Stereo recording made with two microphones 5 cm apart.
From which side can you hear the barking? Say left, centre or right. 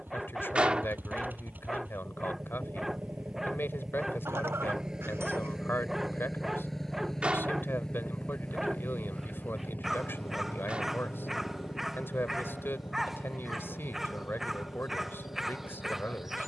centre.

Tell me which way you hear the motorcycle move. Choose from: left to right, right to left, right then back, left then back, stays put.
right to left.